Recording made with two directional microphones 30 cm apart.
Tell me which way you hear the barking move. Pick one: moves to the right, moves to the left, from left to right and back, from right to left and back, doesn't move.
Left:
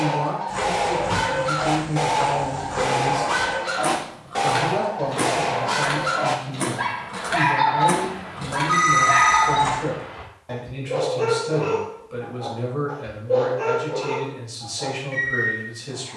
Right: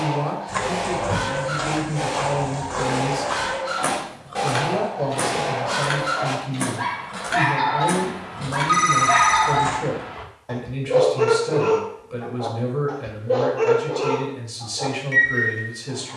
moves to the right.